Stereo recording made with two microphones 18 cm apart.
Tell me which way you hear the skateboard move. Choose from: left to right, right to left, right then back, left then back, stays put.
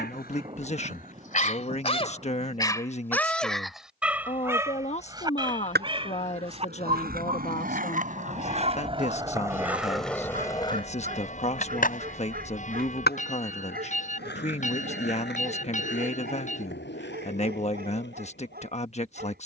right to left.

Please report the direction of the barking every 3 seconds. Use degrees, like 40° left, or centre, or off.
40° left, 10° right, 30° right, 50° right, 50° right, 60° right, 60° right.